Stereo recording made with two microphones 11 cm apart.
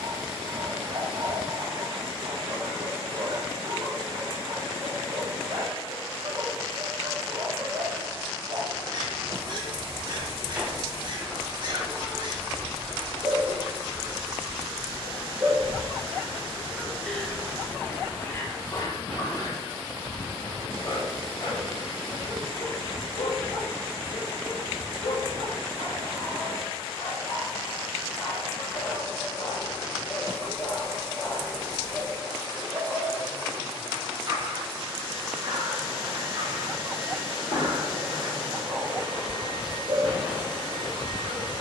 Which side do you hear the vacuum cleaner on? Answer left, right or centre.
left.